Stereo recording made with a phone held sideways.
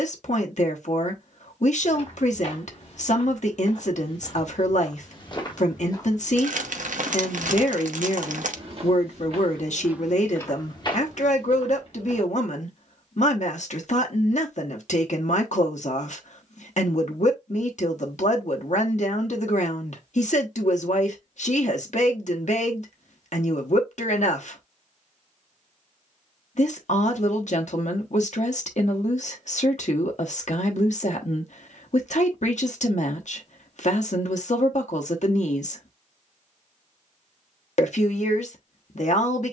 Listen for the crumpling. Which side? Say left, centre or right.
right.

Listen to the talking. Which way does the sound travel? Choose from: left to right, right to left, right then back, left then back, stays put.
stays put.